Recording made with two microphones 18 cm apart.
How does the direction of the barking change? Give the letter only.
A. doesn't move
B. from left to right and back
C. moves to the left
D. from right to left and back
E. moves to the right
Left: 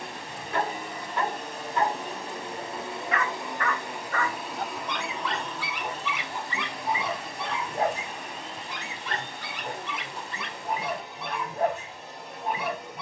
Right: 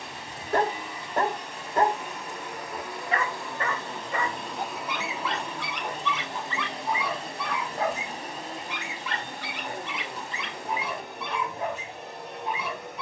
C.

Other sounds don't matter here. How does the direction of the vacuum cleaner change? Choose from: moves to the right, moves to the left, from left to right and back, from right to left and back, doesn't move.
moves to the right.